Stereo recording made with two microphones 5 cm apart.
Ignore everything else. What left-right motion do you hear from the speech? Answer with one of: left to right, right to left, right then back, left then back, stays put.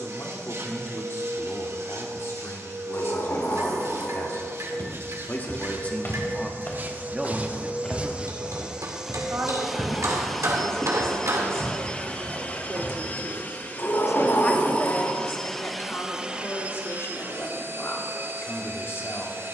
right then back.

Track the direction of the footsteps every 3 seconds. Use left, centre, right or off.
off, left, left, centre, centre, off, off.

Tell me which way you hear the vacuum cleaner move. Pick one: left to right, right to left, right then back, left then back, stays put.
left then back.